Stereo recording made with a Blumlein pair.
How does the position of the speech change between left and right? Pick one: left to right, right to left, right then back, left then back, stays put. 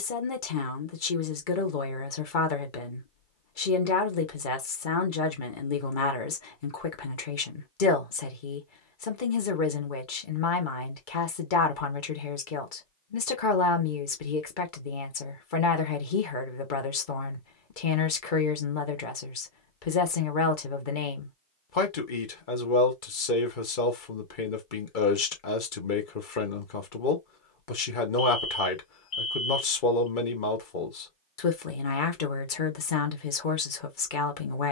stays put.